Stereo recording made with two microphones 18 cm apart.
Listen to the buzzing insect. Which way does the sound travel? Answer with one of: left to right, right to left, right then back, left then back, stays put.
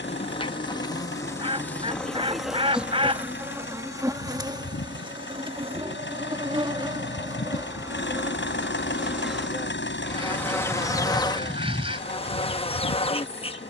right then back.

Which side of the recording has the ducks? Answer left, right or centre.
right.